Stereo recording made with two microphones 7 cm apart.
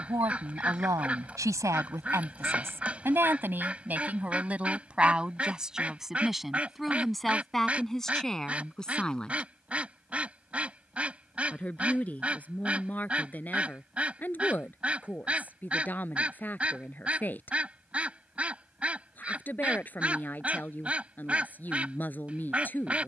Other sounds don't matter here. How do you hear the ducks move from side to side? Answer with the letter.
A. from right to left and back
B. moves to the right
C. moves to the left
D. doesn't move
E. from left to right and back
D.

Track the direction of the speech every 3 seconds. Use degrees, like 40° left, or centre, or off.
50° right, 20° right, centre, 10° left, 20° left, 20° left, 20° left, 20° left.